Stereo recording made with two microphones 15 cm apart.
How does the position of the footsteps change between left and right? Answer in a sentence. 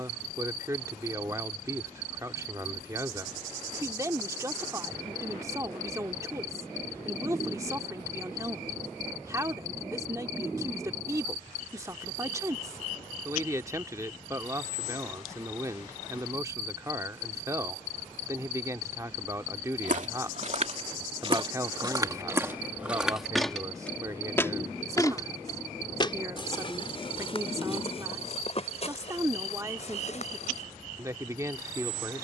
You can hear the footsteps move to the left.